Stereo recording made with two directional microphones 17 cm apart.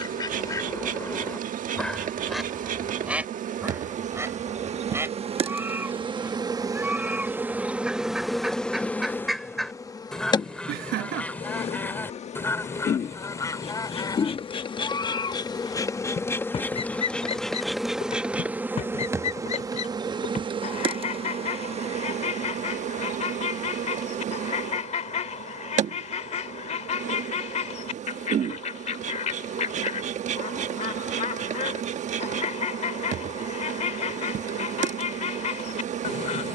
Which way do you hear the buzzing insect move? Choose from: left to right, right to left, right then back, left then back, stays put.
left then back.